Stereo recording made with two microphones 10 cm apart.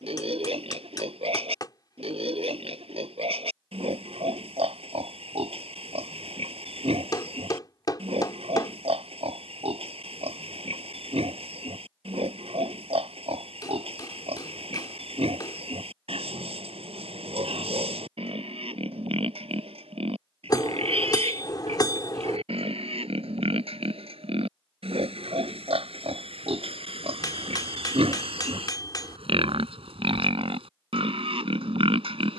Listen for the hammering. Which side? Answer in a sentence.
In this clip you hear the hammering on the left.